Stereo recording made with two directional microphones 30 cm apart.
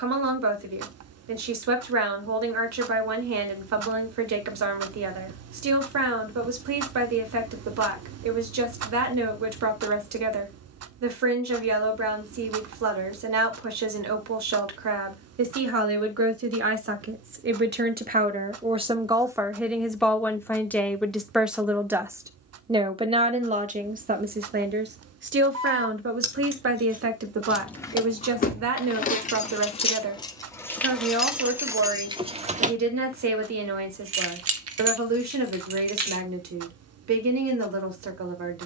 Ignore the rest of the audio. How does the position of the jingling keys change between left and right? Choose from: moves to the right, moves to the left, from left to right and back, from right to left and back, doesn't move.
from right to left and back.